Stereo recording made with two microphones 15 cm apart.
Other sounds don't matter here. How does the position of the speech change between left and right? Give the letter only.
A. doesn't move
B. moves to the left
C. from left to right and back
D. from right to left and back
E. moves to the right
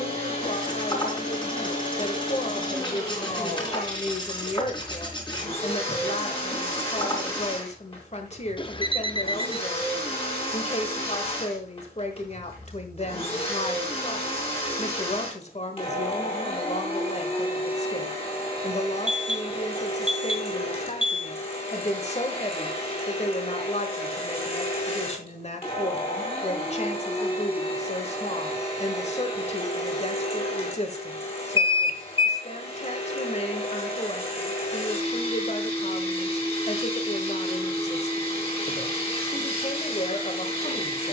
A.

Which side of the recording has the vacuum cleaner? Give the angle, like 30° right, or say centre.
40° left.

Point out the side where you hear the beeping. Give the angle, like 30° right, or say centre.
30° left.